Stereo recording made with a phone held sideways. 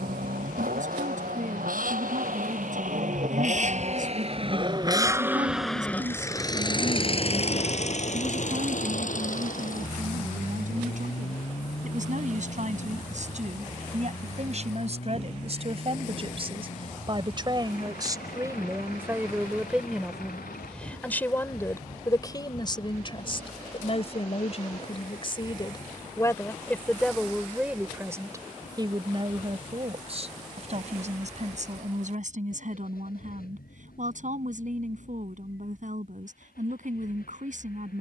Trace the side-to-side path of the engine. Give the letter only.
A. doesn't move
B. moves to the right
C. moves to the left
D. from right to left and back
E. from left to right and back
C.